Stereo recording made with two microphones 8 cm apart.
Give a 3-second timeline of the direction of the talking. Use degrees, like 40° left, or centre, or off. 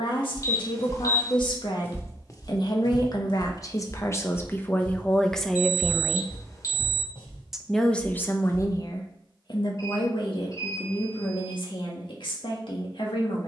60° left, 20° left, 20° left, 70° left, 70° left.